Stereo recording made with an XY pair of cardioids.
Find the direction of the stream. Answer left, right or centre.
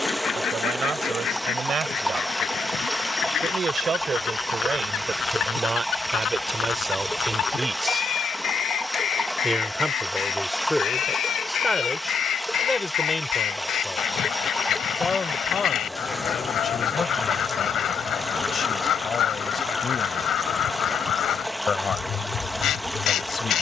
centre.